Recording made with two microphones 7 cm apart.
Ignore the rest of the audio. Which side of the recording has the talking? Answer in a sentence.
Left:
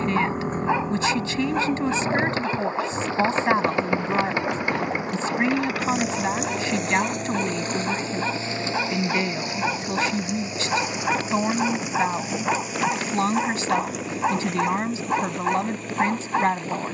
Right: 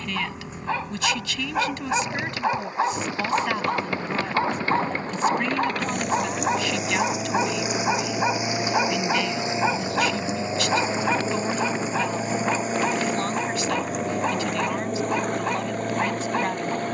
You can hear the talking on the left.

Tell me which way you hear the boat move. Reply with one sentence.
In this clip you hear the boat move from left to right.